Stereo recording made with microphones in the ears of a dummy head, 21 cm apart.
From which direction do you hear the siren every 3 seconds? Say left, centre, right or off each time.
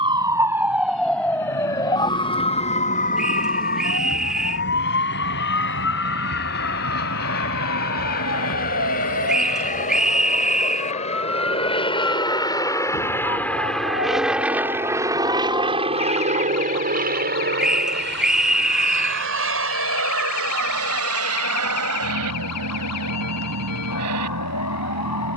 centre, left, left, left, left, left, left, left, left.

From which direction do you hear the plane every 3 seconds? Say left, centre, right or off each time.
left, left, left, left, centre, right, right, right, right.